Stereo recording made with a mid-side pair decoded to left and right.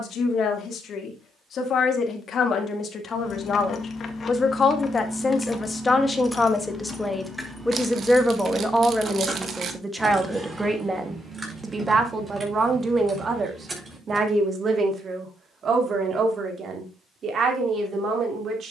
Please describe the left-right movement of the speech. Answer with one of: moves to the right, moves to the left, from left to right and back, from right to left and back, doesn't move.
moves to the right.